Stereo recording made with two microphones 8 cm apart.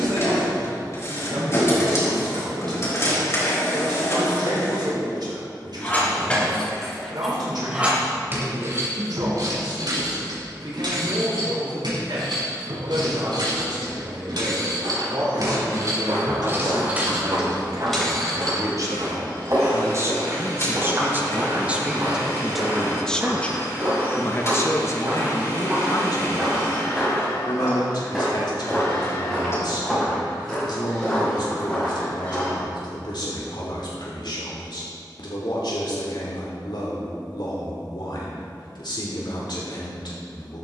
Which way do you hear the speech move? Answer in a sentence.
You can hear the speech travel towards the left.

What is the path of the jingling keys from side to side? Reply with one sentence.
In this clip you hear the jingling keys go right and come back.